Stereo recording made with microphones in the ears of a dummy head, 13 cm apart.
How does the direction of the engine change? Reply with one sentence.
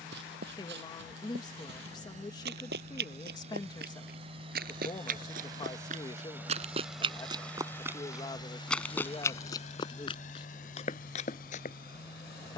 You can hear the engine move from right to left.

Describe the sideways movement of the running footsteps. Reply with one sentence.
In this clip you hear the running footsteps travel towards the left.